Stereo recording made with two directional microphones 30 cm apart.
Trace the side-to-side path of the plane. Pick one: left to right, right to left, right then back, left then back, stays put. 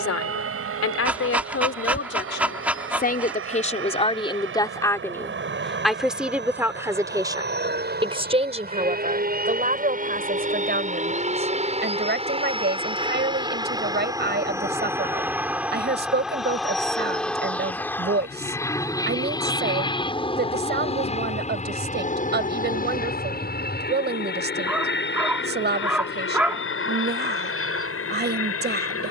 right to left.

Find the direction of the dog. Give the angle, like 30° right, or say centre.
centre.